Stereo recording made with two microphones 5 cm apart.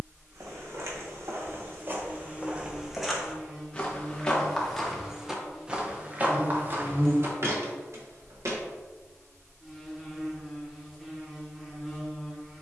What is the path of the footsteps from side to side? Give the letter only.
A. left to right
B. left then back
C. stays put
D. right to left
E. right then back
B.